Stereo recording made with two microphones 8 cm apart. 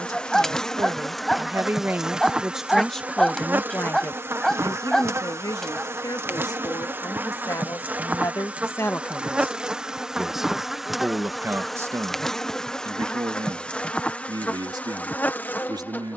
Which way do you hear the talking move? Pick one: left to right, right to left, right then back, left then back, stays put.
left then back.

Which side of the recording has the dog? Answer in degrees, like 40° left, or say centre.
centre.